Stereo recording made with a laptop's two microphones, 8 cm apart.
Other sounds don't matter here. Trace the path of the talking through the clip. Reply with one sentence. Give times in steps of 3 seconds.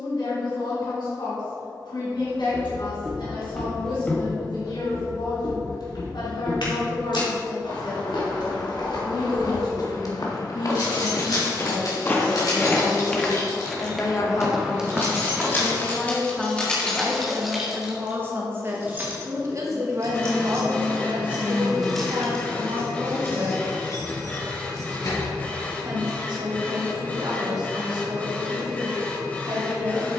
You can hear the talking on the left from 0 s, in the centre from 15 s and on the right from 18 s.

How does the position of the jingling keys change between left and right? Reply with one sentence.
You can hear the jingling keys go right and come back.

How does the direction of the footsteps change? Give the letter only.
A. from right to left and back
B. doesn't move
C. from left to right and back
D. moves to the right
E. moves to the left
A.